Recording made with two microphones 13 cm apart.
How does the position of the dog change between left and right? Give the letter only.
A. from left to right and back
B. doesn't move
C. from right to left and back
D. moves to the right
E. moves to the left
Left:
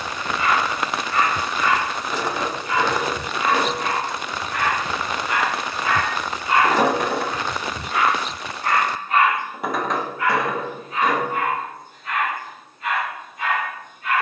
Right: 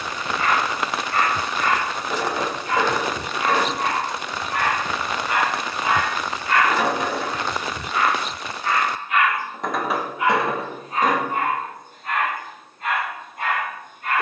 C.